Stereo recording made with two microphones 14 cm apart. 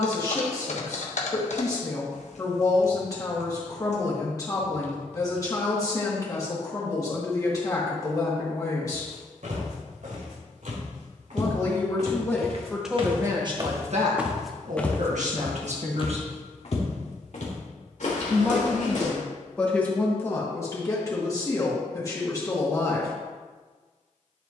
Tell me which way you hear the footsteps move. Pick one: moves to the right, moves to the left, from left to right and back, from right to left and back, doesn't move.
moves to the left.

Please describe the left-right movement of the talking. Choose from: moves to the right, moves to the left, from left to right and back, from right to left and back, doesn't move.
from left to right and back.